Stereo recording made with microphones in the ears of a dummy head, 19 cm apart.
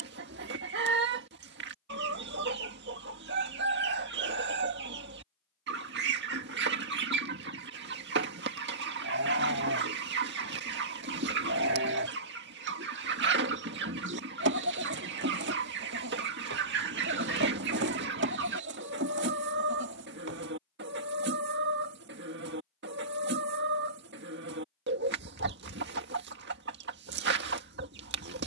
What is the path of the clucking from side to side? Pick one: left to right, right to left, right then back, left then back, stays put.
stays put.